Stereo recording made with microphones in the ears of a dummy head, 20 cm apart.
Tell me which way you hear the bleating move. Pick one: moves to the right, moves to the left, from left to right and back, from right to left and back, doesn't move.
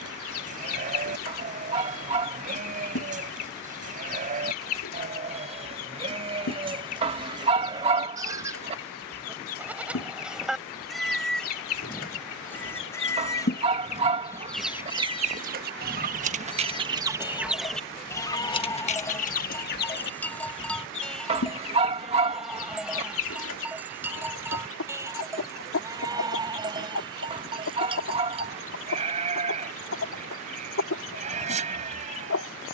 from right to left and back.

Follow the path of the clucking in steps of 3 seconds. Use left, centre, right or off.
left, left, left, left, left, right, left, left, left, left, left.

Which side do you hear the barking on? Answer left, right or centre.
right.